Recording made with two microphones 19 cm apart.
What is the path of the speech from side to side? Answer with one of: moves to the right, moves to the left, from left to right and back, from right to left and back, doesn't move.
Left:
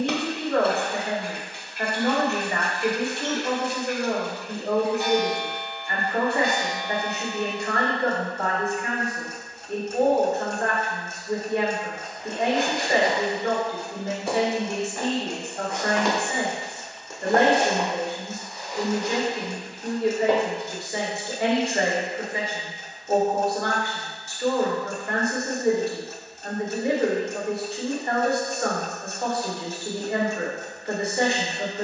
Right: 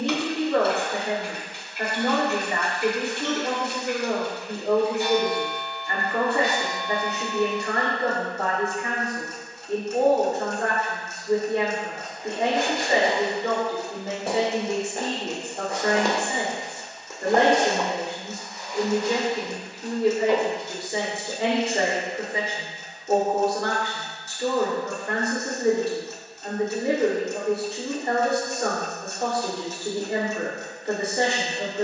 doesn't move.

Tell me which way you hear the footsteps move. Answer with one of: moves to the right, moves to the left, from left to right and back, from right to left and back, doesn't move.
moves to the left.